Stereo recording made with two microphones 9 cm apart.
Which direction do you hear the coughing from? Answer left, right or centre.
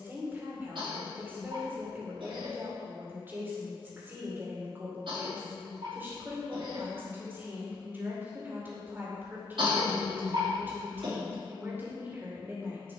right.